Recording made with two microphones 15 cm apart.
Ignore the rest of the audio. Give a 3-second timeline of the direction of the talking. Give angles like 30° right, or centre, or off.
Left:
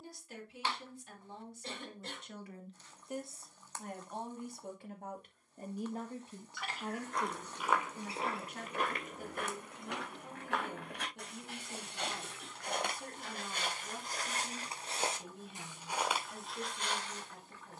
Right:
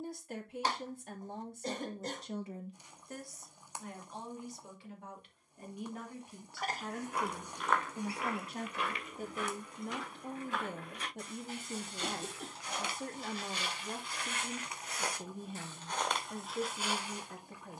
50° right, 40° left, 10° right, 50° right, 50° right, 50° right.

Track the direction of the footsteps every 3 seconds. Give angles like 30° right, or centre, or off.
off, off, 20° left, 70° left, 50° left, centre.